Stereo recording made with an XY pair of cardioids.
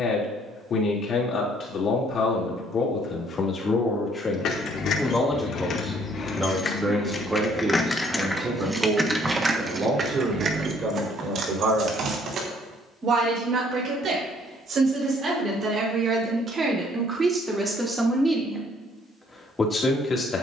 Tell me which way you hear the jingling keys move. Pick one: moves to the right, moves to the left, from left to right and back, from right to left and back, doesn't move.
moves to the right.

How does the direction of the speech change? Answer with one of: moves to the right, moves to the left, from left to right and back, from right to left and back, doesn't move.
from left to right and back.